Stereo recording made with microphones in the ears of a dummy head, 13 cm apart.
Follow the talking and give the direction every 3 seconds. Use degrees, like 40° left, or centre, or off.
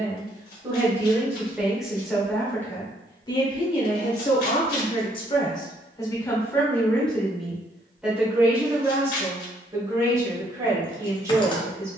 10° right, 40° left, centre, 20° right.